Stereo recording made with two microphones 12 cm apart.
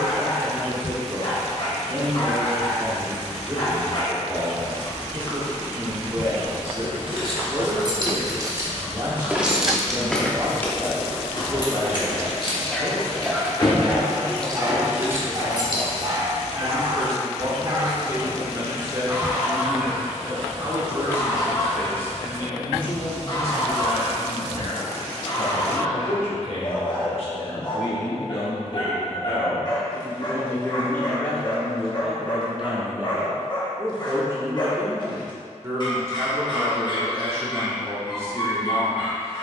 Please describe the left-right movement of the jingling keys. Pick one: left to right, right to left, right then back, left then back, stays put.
left then back.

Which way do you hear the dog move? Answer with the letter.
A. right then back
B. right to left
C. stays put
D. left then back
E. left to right
A.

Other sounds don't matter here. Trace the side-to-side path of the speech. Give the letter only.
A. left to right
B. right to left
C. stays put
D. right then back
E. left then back
E.